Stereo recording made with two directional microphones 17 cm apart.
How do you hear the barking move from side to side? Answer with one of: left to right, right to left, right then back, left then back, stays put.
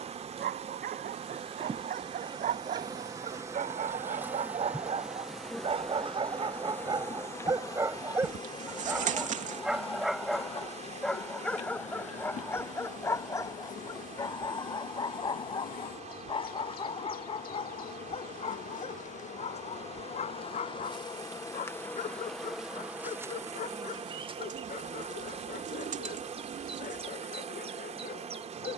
right to left.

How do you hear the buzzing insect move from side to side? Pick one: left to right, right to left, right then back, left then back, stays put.
left then back.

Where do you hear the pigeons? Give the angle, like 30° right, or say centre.
50° right.